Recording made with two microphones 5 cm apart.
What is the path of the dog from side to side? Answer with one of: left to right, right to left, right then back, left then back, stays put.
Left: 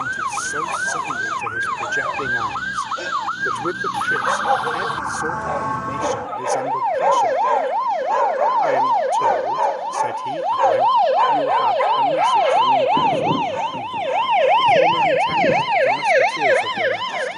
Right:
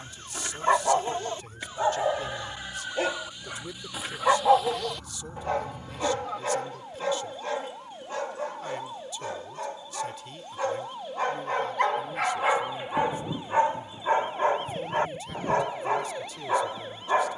left then back.